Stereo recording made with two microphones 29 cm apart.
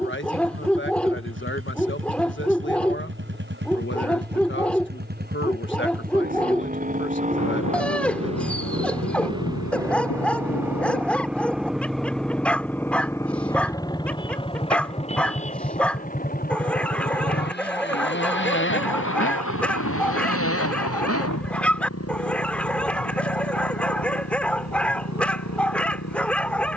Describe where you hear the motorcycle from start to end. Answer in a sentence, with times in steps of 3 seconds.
In this clip you hear the motorcycle on the right from 0 s, in the centre from 9 s and on the left from 15 s.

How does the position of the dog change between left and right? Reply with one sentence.
In this clip you hear the dog stay put.